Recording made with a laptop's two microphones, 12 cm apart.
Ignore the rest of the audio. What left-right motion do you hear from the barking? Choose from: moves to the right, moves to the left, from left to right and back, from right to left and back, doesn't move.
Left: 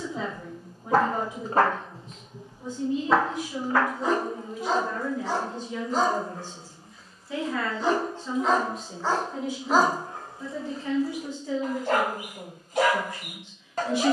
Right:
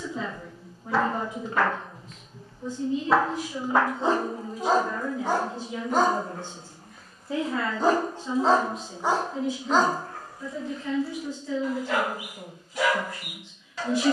from left to right and back.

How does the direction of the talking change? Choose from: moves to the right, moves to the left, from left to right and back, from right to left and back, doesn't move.
from left to right and back.